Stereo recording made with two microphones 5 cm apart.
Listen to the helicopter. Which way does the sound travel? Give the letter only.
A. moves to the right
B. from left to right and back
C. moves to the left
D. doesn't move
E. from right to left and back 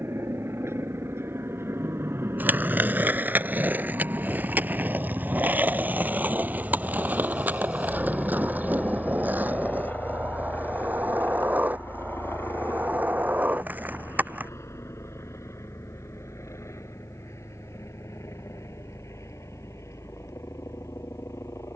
C.